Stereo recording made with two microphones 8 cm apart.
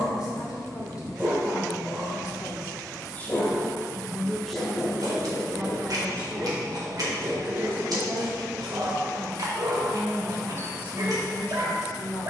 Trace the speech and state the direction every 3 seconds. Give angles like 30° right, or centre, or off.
50° left, centre, 30° right, 20° left.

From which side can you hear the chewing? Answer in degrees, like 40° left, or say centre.
60° right.